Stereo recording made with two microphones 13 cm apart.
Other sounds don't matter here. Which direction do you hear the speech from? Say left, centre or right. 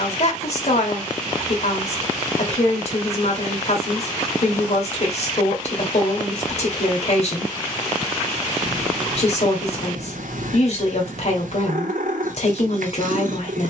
left.